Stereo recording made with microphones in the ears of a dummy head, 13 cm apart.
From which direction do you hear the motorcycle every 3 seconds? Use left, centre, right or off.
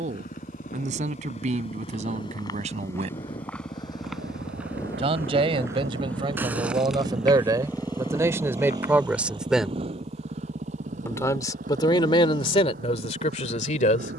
left, left, centre, right, right.